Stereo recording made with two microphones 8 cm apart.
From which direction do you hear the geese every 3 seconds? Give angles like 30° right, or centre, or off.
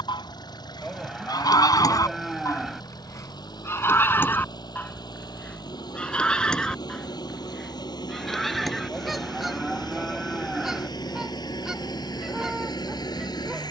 50° left, 20° left, 10° left, centre, 10° right.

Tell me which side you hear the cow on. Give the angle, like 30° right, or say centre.
centre.